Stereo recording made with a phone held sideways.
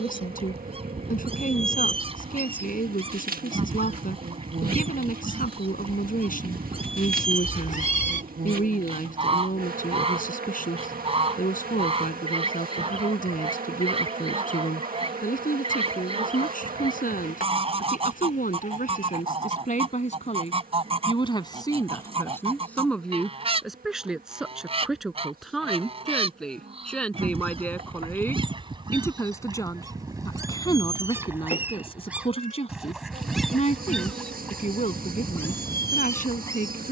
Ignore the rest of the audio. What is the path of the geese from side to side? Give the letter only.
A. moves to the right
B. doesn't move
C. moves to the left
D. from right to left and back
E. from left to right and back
C.